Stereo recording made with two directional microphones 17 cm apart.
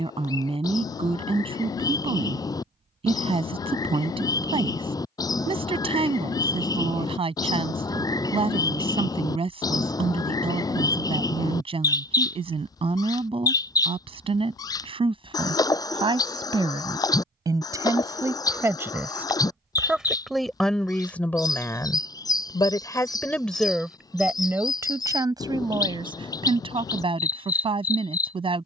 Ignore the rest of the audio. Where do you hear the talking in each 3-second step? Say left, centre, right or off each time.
right, right, right, right, right, right, centre, centre, right, right.